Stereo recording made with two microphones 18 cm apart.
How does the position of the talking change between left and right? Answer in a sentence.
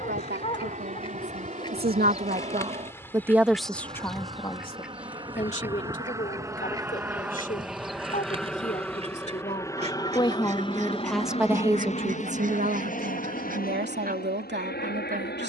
You can hear the talking move from right to left and back again.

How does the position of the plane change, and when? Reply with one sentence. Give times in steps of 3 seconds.
In this clip you hear the plane on the right from 0 s, in the centre from 6 s and on the left from 9 s.